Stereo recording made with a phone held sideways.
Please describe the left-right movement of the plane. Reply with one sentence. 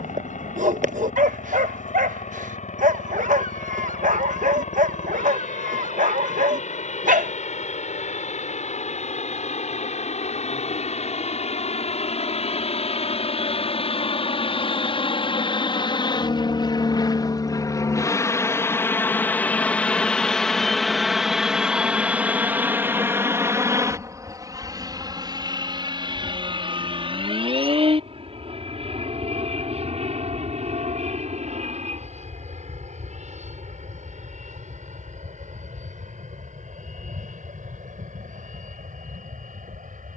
In this clip you hear the plane move from left to right.